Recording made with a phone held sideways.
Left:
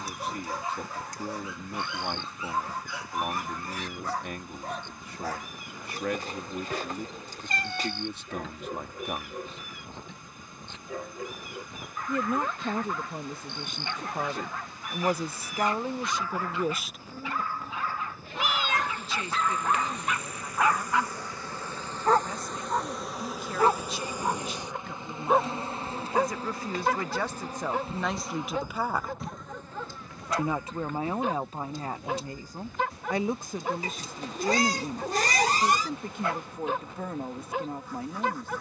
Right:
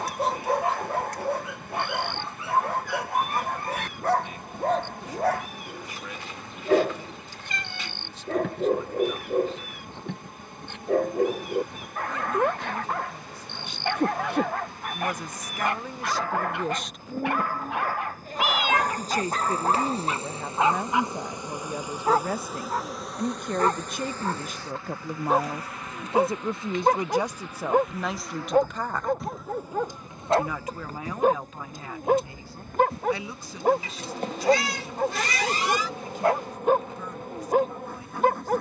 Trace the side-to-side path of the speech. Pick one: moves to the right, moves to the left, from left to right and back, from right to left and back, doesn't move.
from left to right and back.